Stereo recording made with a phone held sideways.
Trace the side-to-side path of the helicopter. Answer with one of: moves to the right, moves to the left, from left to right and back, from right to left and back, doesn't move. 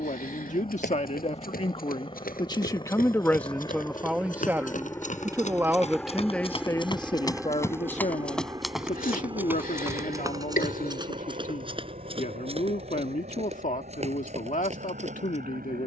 moves to the right.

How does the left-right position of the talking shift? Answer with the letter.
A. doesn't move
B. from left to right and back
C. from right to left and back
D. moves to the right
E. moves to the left
B.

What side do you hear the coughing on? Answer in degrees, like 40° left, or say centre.
80° left.